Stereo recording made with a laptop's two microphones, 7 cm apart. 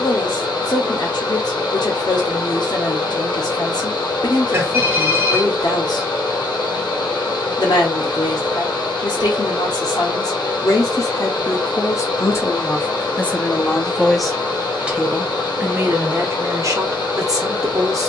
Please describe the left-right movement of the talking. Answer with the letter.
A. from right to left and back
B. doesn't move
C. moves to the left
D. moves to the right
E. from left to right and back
D.